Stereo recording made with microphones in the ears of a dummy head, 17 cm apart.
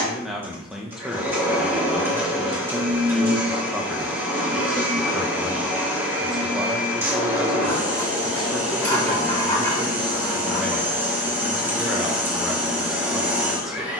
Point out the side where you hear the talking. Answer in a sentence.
You can hear the talking in the centre.